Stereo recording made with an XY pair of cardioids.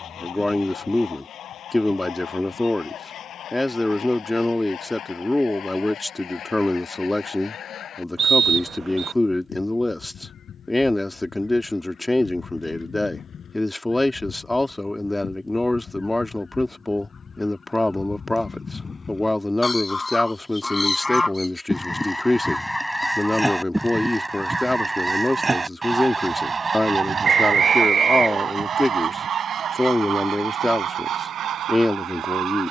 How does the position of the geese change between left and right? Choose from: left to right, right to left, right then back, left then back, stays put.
left to right.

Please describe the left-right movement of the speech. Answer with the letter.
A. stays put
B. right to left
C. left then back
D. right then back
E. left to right
A.